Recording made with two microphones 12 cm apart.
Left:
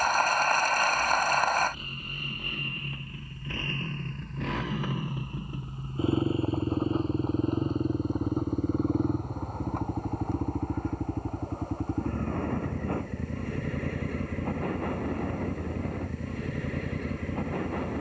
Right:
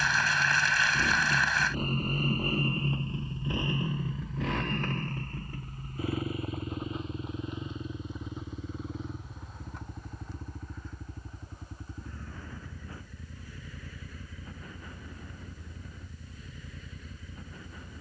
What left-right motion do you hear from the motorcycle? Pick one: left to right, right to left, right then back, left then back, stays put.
right to left.